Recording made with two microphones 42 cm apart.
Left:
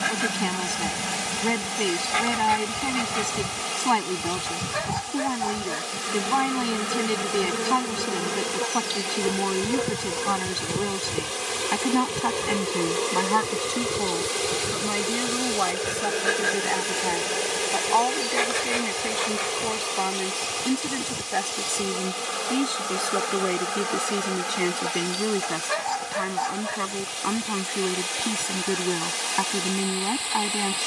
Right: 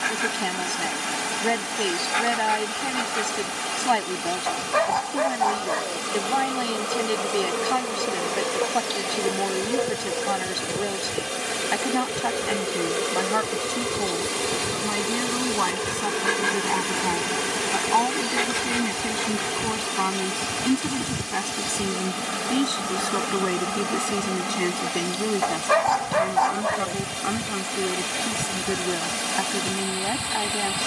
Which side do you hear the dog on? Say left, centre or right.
right.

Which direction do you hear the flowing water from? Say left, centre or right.
right.